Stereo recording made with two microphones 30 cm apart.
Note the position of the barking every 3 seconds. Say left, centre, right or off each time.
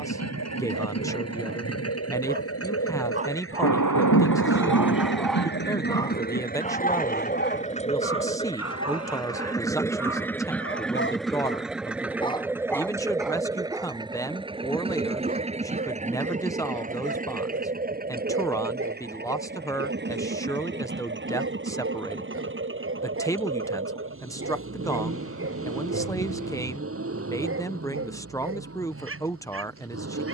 right, centre, left, left, centre, right, right, right, right, right.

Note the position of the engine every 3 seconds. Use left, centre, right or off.
left, left, left, centre, centre, right, right, right, right, right.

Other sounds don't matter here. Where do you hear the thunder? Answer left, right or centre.
left.